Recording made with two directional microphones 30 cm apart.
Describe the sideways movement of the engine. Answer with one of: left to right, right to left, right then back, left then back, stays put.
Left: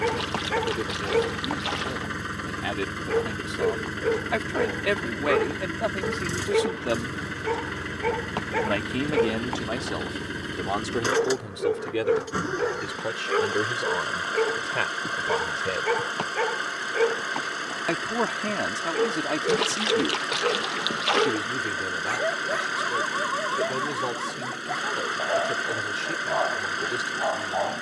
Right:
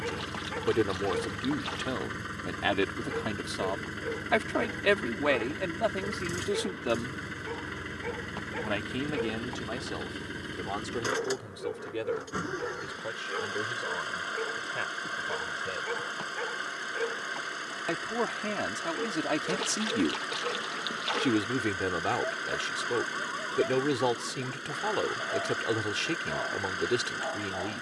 stays put.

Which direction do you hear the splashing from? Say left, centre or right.
left.